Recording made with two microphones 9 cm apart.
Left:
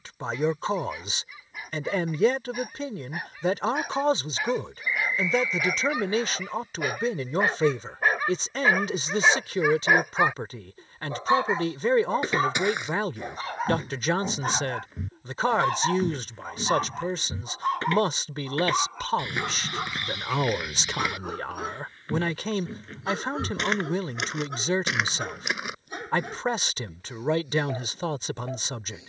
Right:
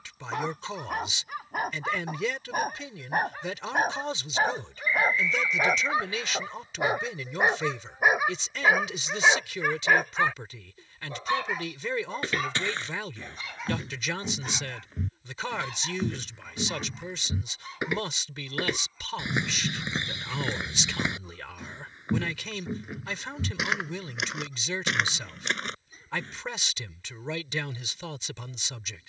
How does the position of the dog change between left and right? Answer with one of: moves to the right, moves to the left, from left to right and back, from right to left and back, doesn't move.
moves to the left.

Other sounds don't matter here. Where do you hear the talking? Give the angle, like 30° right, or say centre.
40° left.